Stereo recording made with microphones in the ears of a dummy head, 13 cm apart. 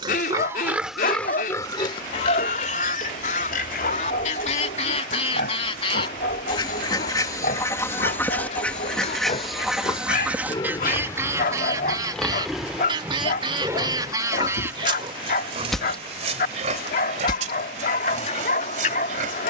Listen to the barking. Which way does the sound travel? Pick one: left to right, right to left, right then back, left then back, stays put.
stays put.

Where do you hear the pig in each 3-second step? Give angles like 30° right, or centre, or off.
20° left, 60° left, 60° left, 30° left, 20° right, 50° right, 60° right.